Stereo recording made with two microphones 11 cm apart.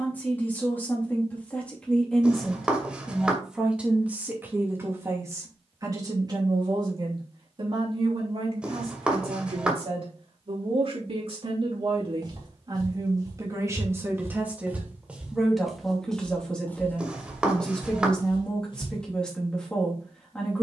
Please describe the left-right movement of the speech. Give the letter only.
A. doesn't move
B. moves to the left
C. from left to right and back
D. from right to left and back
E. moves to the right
C.